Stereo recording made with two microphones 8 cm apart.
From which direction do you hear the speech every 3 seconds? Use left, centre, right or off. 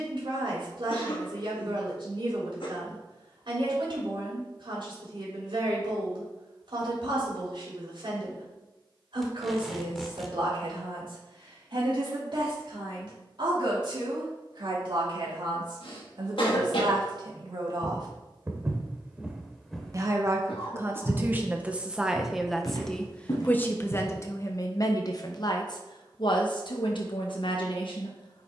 right, right, right, right, right, right, right, centre, left, left.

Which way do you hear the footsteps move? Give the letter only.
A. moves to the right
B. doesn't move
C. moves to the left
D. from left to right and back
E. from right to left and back
C.